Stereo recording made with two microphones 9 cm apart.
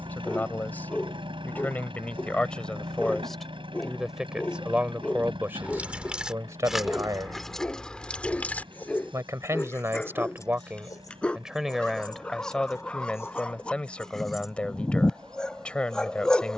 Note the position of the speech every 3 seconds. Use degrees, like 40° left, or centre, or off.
20° left, 10° right, 40° right, 20° right, 10° left, 10° left.